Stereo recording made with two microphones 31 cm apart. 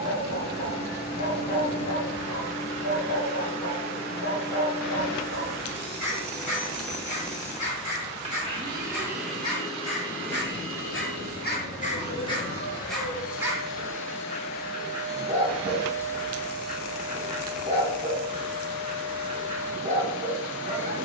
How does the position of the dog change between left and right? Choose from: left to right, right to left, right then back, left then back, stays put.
left to right.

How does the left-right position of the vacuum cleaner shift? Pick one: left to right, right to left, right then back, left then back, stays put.
left then back.